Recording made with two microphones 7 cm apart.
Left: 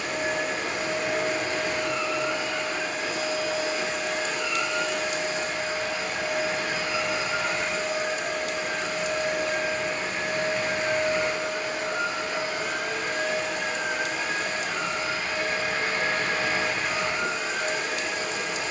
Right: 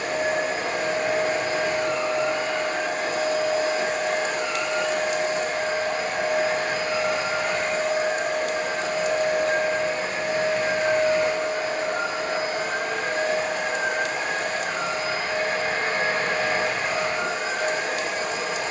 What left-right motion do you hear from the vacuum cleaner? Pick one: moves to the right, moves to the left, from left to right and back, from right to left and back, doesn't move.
doesn't move.